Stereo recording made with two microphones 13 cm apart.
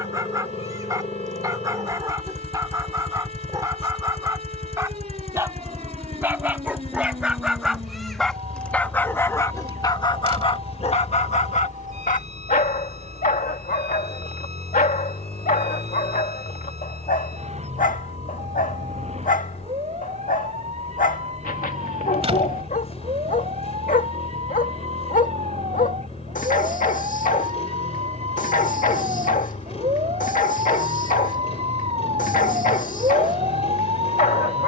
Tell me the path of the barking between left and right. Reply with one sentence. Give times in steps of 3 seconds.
You can hear the barking on the right from 0 s, in the centre from 6 s and on the left from 9 s.